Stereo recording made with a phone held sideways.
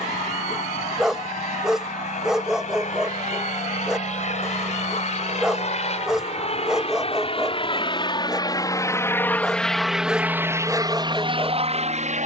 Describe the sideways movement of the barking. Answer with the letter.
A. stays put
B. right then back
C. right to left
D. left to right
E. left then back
A.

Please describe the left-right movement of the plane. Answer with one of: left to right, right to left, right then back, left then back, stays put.
left to right.